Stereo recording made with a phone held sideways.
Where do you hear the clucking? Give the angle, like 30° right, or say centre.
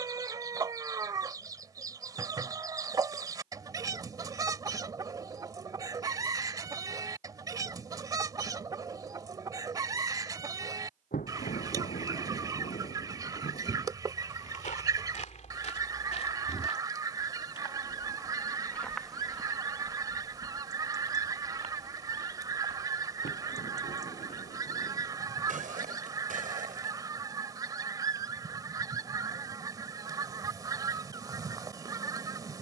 30° right.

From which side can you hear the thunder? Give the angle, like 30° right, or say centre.
90° left.